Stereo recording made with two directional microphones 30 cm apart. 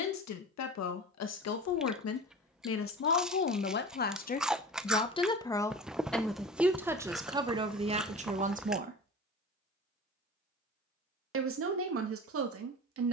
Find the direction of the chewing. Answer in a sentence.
In this clip you hear the chewing in the centre.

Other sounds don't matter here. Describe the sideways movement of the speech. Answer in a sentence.
You can hear the speech travel towards the right.